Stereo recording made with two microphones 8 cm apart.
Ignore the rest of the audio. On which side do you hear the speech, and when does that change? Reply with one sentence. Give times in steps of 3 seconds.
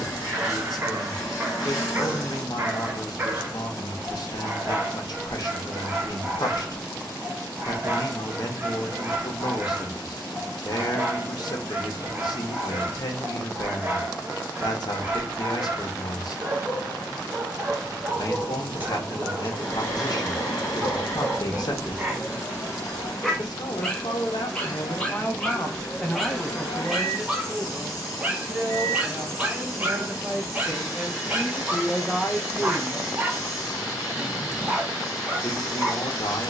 You can hear the speech on the left from 0 s, in the centre from 27 s and on the left from 33 s.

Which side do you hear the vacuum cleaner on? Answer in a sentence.
You can hear the vacuum cleaner on the left.